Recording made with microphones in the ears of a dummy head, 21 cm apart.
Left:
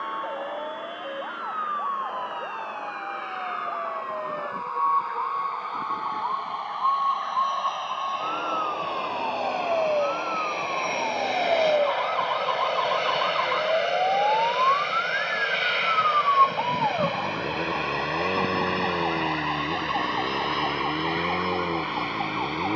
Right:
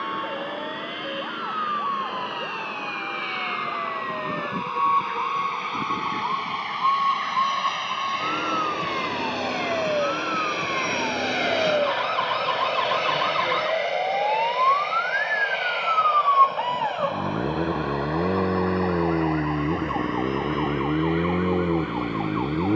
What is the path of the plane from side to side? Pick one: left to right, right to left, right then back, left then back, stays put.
right to left.